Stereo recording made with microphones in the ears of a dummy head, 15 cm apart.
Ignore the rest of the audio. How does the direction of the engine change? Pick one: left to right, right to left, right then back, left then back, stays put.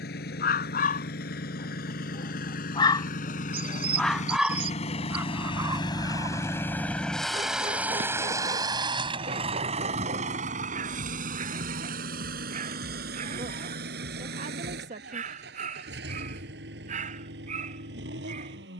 left to right.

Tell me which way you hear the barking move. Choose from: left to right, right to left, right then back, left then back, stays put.
left to right.